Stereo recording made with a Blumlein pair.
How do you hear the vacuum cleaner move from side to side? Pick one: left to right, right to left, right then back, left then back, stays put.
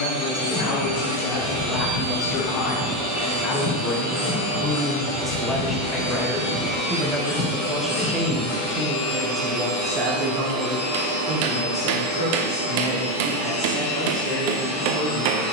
stays put.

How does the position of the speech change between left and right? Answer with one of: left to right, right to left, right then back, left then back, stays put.
left to right.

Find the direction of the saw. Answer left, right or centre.
left.